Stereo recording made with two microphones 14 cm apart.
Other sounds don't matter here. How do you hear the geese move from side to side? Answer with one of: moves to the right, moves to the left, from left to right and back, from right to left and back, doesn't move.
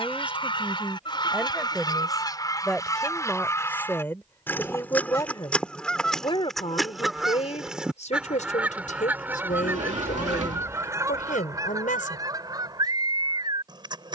moves to the right.